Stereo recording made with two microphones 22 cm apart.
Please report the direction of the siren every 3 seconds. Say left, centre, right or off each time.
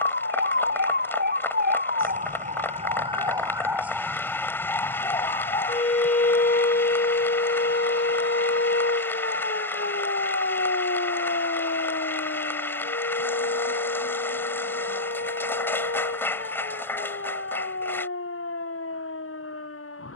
right, centre, left, left, left, left, left.